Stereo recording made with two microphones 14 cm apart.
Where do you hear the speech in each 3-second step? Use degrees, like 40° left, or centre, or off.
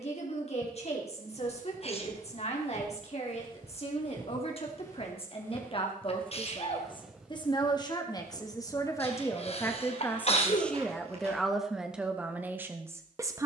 50° left, 40° left, 30° left, 10° left, 10° right.